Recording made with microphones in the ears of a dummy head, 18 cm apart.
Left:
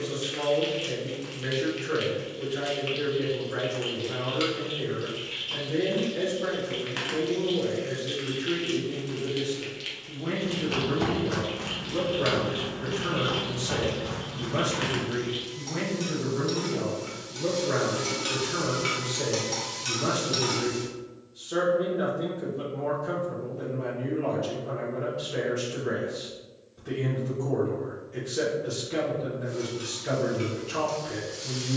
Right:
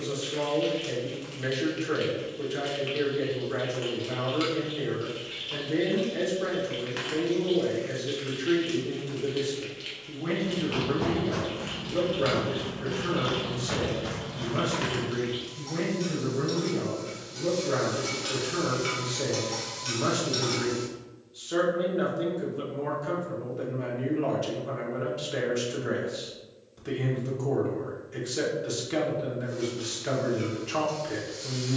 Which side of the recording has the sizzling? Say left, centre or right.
centre.